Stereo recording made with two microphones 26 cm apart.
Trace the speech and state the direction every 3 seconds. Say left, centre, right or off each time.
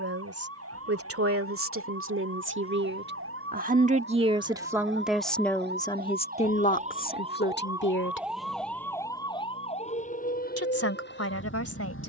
right, centre, left, left.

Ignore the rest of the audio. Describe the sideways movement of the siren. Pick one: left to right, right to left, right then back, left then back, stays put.
right to left.